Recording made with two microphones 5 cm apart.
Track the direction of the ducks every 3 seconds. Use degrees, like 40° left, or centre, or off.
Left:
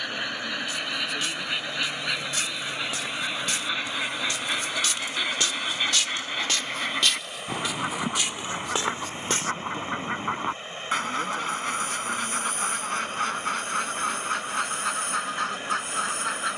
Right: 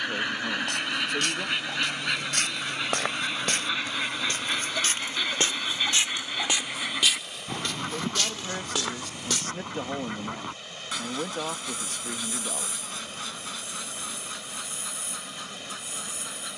10° right, centre, 20° left, 40° left, 50° left, 60° left.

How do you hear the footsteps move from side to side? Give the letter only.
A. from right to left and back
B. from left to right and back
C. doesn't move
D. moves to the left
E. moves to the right
D.